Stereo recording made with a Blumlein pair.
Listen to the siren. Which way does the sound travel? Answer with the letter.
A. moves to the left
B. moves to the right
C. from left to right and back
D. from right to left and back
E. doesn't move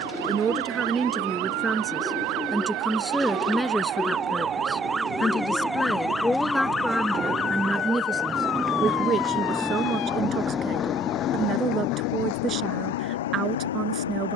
A.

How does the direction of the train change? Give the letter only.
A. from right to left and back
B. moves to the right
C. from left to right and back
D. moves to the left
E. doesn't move
D.